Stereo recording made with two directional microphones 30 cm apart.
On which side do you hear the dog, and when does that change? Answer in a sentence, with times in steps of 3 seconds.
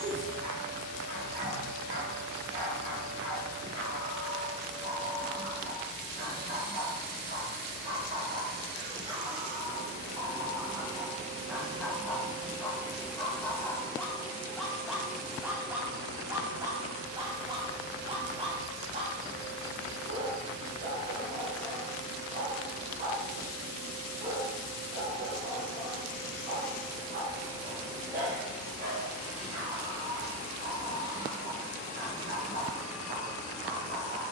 You can hear the dog on the right from 0 s, in the centre from 9 s and on the right from 18 s.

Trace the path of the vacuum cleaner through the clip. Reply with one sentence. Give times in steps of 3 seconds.
You can hear the vacuum cleaner on the right from 0 s, in the centre from 12 s and on the left from 15 s.